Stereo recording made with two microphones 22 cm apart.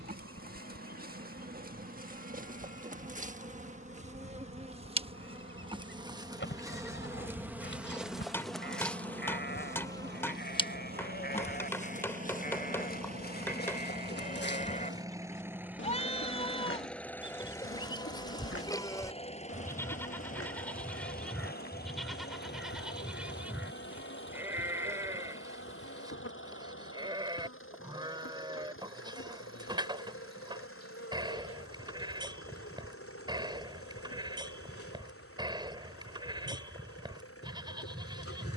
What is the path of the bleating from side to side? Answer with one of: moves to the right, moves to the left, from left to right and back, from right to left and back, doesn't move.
moves to the right.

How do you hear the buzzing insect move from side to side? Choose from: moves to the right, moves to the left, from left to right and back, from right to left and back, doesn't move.
moves to the left.